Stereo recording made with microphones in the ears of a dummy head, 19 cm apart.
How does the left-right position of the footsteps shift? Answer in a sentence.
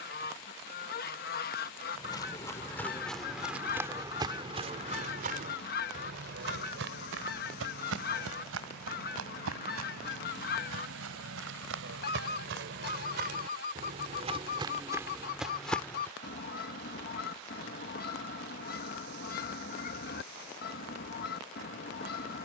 In this clip you hear the footsteps go right and come back.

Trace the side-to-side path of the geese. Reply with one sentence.
You can hear the geese stay put.